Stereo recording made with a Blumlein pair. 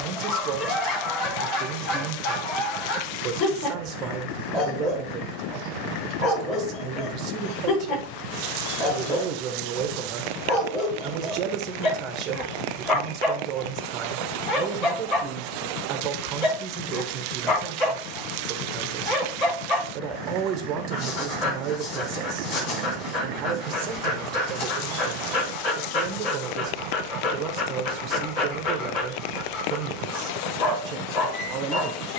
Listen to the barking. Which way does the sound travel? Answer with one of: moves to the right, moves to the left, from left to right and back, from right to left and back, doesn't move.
doesn't move.